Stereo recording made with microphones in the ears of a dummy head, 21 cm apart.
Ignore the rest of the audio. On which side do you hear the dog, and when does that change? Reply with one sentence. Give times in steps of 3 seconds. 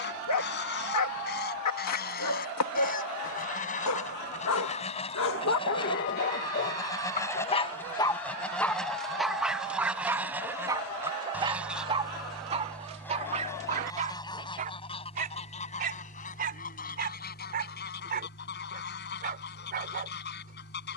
You can hear the dog on the left from 0 s, in the centre from 9 s and on the right from 12 s.